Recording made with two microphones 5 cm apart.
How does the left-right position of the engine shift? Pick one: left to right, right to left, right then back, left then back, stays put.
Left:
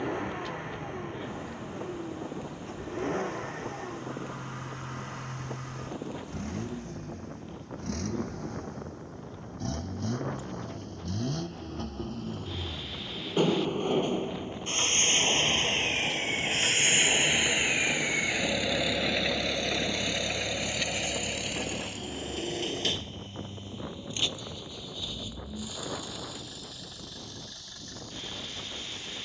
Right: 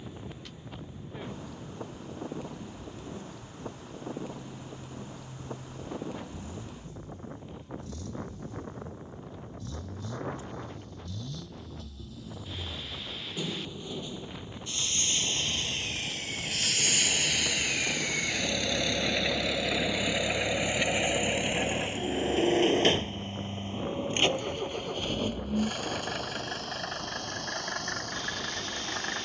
left to right.